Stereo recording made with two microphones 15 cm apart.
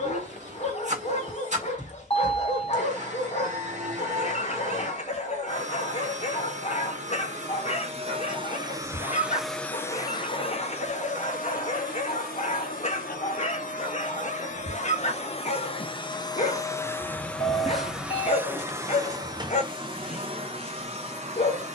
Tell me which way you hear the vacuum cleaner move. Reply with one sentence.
You can hear the vacuum cleaner go left and come back.